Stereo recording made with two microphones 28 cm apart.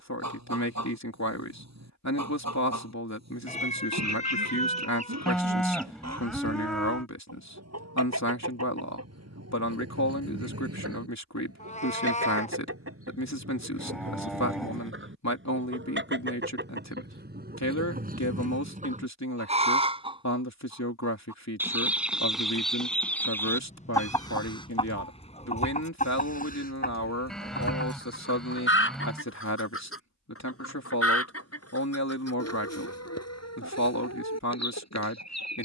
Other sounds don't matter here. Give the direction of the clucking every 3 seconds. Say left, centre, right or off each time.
right, right, right, right, right, right, right, centre, left, left, left, left.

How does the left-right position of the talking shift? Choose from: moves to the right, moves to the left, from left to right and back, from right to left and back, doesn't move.
doesn't move.